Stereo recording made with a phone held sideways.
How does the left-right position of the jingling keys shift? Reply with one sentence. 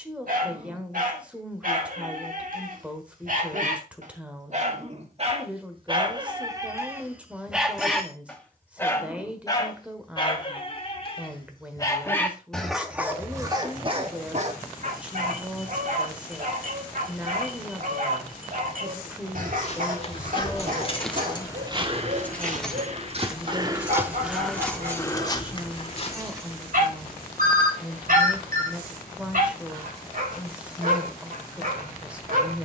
In this clip you hear the jingling keys move to the right.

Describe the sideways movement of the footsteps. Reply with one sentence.
In this clip you hear the footsteps go right and come back.